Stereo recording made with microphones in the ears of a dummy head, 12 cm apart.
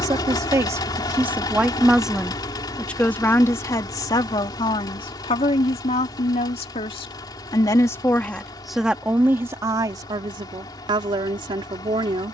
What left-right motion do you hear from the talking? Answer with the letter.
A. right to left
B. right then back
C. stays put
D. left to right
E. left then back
E.